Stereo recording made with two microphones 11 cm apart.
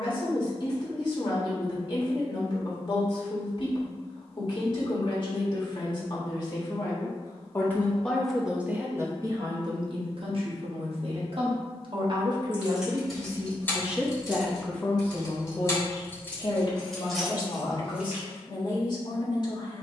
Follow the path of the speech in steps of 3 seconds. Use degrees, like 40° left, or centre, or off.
40° left, 40° left, 20° left, 50° right, 20° right, 30° left, 40° left.